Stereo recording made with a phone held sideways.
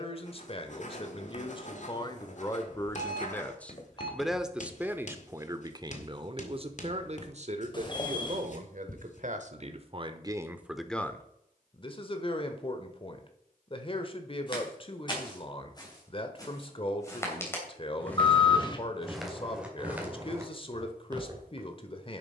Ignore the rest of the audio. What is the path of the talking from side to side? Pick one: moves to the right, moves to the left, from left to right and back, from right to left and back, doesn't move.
from left to right and back.